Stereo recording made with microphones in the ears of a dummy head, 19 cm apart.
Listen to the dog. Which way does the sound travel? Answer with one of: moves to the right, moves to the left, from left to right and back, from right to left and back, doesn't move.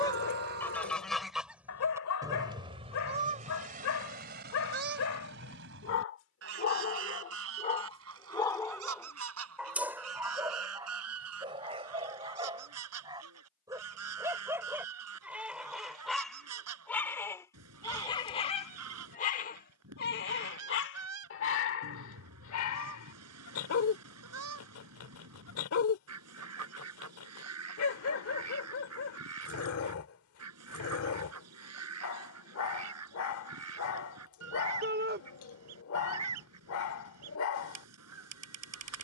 from left to right and back.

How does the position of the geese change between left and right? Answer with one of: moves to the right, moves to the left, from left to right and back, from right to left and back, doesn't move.
moves to the right.